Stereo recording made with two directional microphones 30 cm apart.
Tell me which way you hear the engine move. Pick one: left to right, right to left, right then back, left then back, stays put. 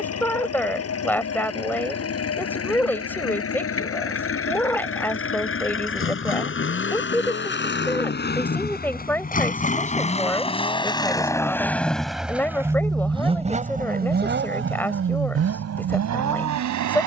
left to right.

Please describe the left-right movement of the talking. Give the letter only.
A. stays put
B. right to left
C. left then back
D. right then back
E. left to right
A.